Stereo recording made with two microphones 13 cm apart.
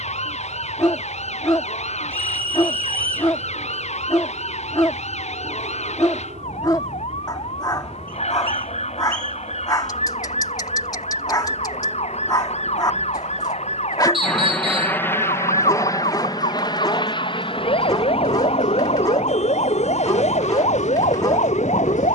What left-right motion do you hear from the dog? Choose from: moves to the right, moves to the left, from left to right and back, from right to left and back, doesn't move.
doesn't move.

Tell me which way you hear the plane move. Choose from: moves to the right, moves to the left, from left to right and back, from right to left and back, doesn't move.
moves to the left.